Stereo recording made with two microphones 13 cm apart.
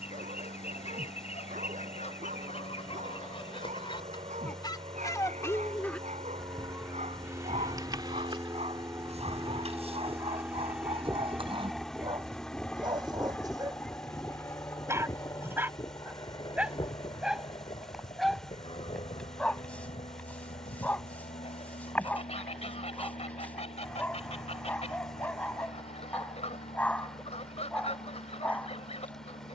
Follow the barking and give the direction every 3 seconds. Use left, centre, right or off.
right, right, right, right, right, centre, centre, centre, centre, centre.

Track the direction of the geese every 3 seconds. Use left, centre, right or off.
left, left, right, right, centre, left, left, left, left, left.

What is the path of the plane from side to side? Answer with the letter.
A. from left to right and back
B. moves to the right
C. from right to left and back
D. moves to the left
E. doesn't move
D.